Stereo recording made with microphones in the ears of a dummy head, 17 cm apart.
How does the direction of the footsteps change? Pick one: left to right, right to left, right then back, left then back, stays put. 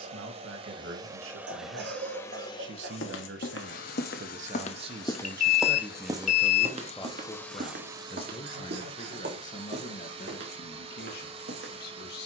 left to right.